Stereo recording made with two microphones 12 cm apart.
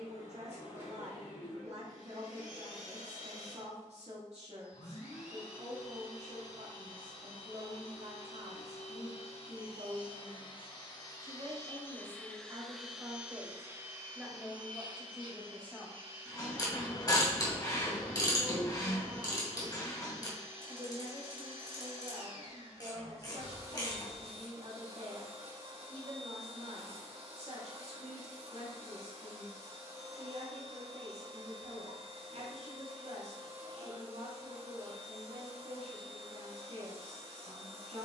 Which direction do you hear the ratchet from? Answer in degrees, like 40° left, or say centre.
30° left.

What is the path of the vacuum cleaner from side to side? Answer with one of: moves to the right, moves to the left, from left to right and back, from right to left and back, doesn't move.
moves to the right.